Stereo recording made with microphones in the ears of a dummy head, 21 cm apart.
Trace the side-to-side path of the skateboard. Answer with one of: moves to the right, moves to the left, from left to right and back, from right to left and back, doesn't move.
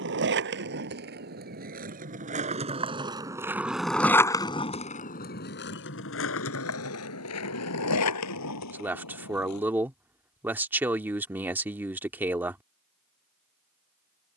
moves to the left.